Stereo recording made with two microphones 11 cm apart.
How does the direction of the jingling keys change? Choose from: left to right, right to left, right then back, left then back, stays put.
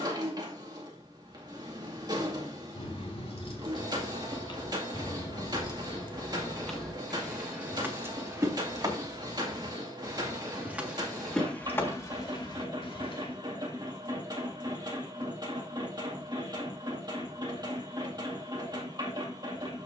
right then back.